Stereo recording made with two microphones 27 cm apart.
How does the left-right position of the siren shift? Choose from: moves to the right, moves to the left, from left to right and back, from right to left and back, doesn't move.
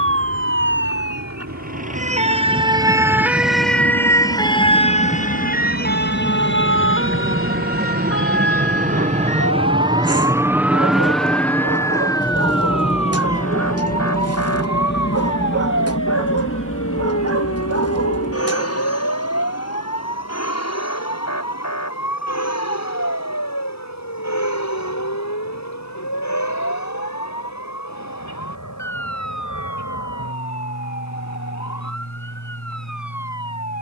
moves to the left.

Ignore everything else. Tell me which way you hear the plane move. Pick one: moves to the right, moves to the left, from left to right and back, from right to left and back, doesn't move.
moves to the left.